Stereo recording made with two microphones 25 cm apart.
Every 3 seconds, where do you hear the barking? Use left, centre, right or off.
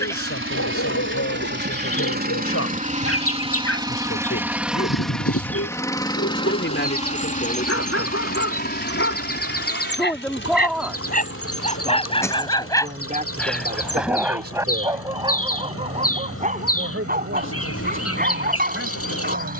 left, left, left, left, centre, right, right.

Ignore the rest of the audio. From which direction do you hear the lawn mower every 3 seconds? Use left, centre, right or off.
right, centre, left, left, left, left, left.